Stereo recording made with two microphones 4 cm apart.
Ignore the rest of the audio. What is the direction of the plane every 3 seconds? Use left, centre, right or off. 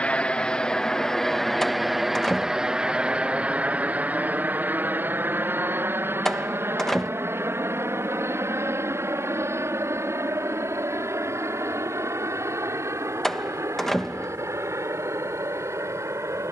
centre, right, right, right, right, right.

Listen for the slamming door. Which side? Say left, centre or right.
centre.